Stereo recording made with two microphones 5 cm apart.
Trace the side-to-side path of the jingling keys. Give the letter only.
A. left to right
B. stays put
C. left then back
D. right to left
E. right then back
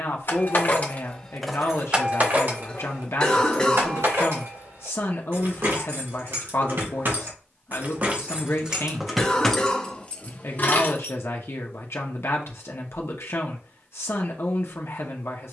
E.